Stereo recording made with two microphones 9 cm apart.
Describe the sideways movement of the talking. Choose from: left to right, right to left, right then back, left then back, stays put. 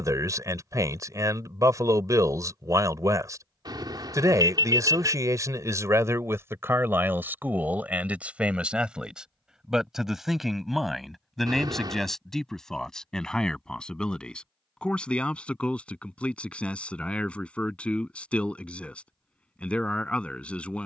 right to left.